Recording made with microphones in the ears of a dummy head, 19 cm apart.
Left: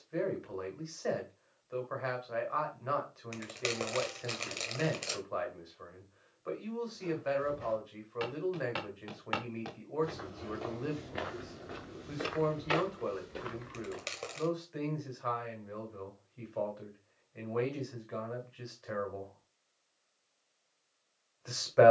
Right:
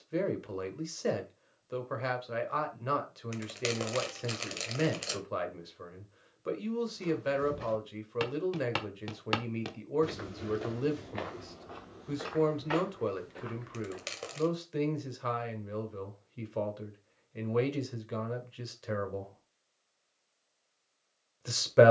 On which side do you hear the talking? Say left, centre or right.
right.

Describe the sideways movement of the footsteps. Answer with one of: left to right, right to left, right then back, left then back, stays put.
right to left.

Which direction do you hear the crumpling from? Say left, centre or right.
centre.